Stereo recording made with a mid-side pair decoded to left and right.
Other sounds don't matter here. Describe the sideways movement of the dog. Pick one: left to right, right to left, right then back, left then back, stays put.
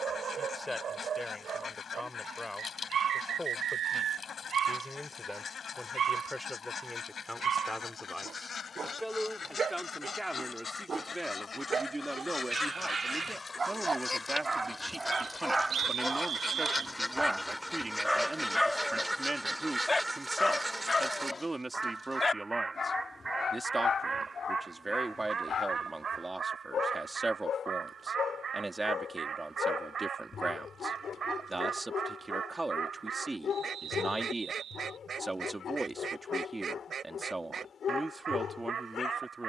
right to left.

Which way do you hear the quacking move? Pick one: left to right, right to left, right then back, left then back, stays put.
left to right.